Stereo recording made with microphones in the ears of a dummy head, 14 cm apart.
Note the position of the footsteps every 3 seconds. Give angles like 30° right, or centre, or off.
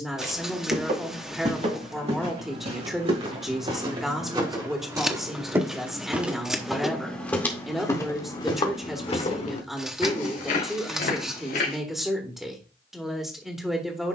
50° right, 30° right, 10° left, 50° left, off.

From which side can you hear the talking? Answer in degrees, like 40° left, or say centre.
centre.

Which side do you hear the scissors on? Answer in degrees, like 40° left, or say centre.
centre.